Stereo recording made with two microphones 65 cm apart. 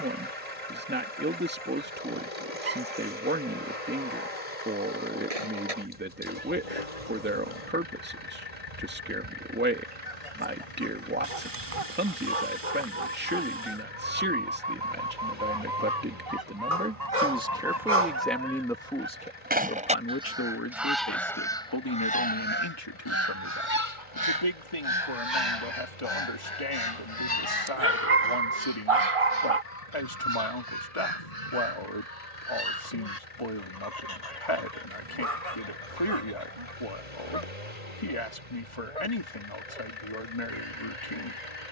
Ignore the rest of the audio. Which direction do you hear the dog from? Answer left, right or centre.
right.